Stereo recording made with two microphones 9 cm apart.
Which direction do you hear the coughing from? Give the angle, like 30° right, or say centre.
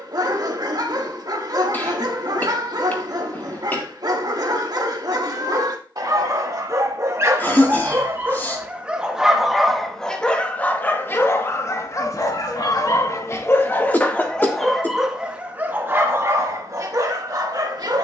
20° left.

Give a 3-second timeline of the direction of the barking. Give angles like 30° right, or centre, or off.
50° right, 50° right, 30° right, 20° left, 30° left, 30° right.